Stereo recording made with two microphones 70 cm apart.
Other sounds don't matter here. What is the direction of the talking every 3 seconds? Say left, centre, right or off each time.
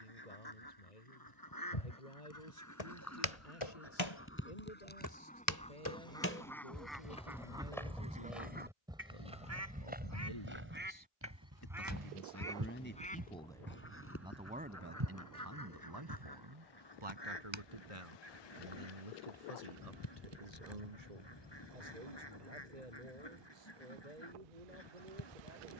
left, left, left, left, centre, right, right, right, right.